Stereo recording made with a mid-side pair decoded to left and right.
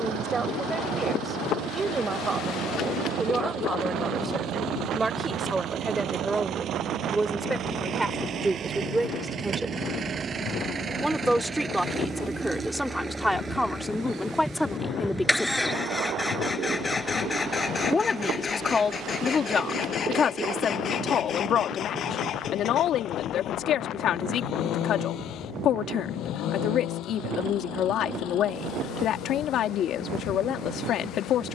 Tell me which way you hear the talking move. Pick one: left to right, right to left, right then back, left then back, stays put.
right to left.